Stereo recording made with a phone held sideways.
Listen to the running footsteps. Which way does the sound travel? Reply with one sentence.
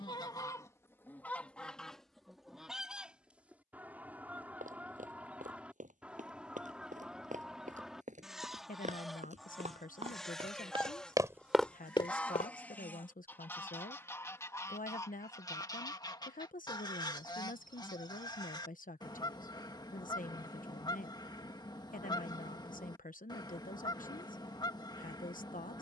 You can hear the running footsteps travel towards the left.